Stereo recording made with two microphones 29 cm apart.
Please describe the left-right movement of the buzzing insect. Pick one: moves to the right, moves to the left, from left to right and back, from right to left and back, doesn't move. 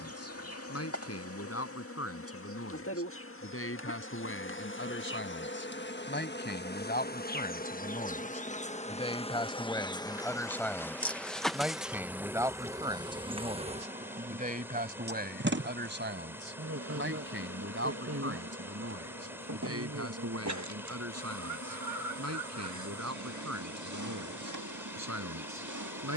moves to the right.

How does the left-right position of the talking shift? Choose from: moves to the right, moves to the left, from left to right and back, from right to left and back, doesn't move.
moves to the right.